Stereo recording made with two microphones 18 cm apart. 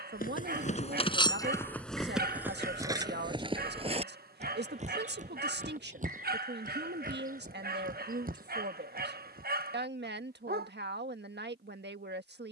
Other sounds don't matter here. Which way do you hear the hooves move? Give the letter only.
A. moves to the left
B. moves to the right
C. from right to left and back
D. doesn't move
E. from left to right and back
B.